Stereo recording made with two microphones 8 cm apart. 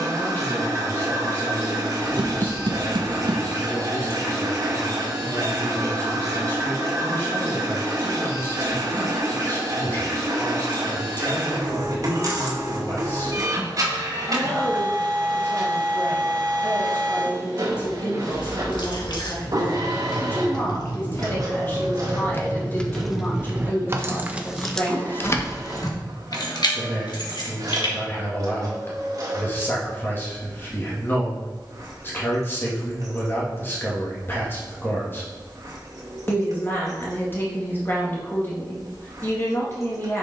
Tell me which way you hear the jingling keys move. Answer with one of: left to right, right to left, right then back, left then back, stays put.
right then back.